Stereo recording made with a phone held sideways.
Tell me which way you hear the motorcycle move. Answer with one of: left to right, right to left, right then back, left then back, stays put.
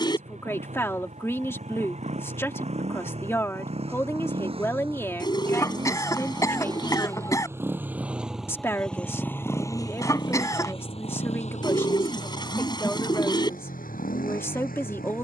right to left.